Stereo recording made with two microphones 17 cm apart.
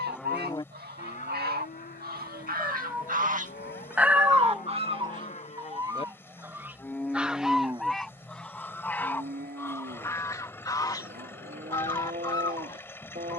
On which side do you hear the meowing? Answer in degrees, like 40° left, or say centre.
10° right.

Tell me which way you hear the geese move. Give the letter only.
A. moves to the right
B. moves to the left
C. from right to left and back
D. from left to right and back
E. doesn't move
B.